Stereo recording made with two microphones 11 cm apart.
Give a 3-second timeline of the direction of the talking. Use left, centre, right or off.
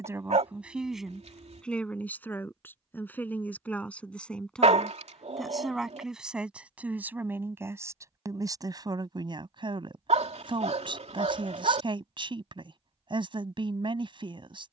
centre, centre, right, right, right.